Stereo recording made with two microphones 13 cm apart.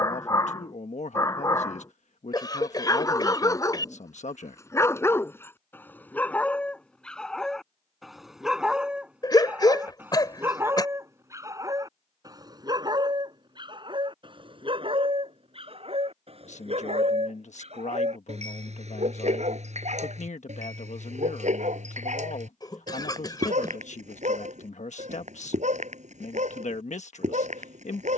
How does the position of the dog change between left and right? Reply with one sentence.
You can hear the dog move to the right.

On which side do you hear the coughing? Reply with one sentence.
In this clip you hear the coughing on the left.